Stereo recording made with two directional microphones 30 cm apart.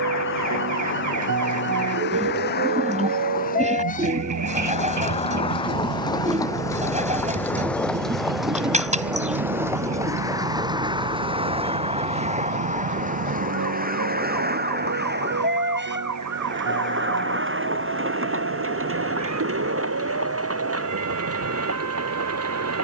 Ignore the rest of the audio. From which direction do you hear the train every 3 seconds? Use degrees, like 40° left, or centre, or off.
40° left, 20° left, 10° left, 10° right, 30° right, 40° right, 50° right, 50° right.